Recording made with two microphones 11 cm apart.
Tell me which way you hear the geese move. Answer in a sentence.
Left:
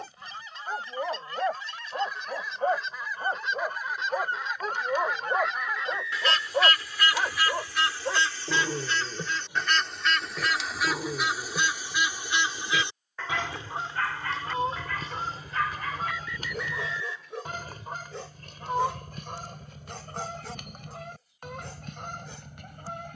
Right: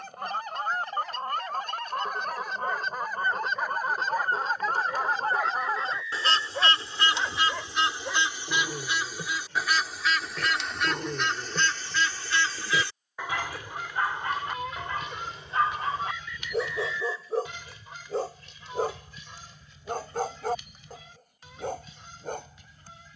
You can hear the geese go from the right side to the left.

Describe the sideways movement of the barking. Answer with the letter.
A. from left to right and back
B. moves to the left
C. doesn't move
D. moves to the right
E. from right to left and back
D.